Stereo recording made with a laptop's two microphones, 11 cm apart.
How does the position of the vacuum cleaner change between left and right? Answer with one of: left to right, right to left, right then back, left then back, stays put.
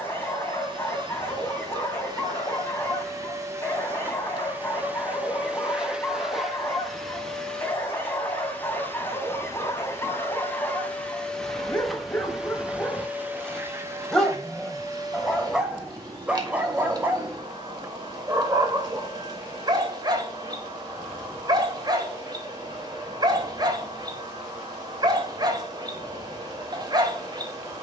left then back.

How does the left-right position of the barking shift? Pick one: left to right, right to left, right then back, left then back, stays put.
left to right.